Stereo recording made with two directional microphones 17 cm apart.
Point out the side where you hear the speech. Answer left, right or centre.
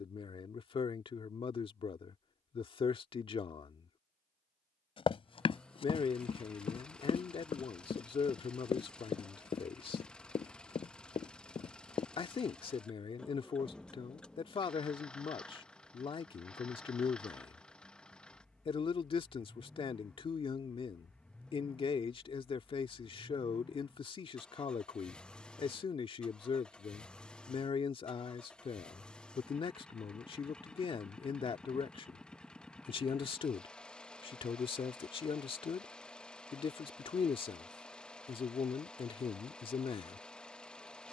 left.